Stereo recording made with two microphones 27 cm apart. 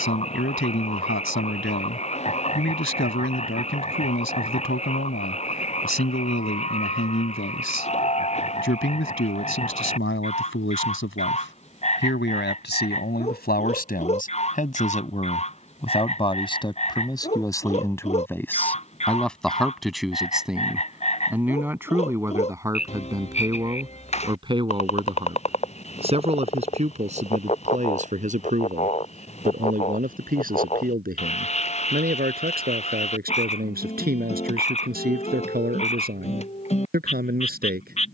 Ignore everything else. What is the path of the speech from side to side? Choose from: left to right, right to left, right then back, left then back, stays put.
left to right.